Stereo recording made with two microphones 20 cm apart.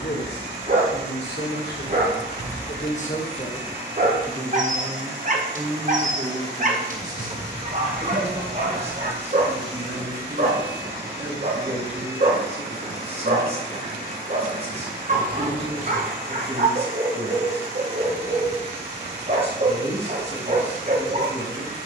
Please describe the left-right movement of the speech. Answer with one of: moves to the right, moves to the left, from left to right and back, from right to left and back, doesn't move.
moves to the right.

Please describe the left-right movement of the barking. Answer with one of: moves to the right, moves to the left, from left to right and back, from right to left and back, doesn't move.
doesn't move.